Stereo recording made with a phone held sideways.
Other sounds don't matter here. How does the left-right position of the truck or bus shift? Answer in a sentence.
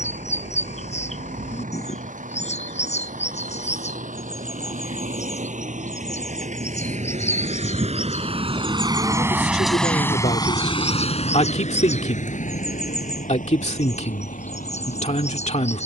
You can hear the truck or bus move from right to left.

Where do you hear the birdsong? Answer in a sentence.
You can hear the birdsong on the left.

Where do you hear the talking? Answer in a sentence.
In this clip you hear the talking on the left.